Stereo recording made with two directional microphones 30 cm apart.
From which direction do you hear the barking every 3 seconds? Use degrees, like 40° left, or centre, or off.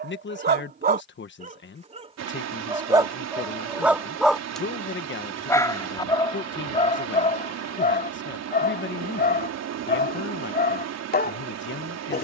30° right, centre, 20° left, 30° left.